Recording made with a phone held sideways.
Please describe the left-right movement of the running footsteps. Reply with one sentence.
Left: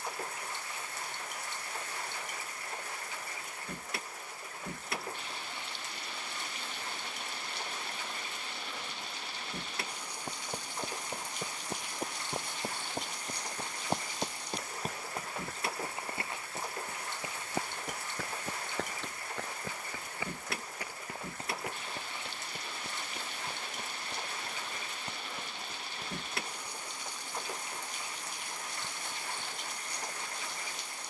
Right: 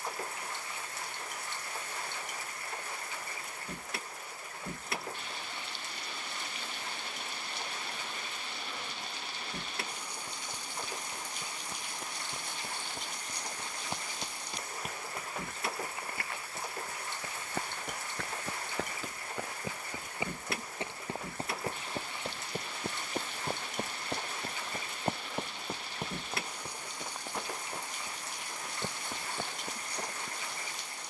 You can hear the running footsteps go from the left side to the right.